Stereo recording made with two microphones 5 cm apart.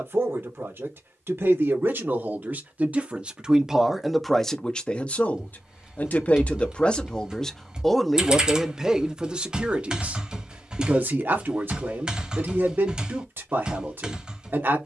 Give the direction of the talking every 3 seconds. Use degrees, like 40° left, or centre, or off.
50° right, centre, 10° left, 30° right, 50° right.